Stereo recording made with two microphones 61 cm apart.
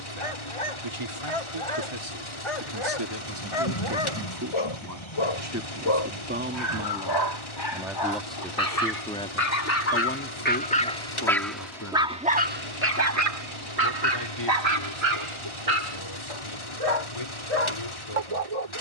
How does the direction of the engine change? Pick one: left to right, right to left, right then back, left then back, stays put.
stays put.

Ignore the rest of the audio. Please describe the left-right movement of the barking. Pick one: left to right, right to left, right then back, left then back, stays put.
left to right.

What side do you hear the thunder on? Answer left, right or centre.
left.